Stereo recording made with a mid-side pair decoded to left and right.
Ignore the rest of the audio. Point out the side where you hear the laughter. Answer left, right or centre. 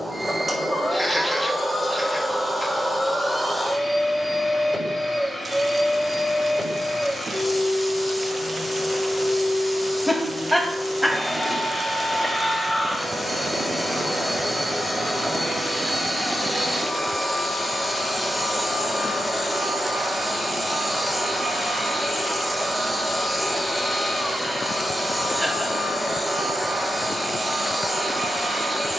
centre.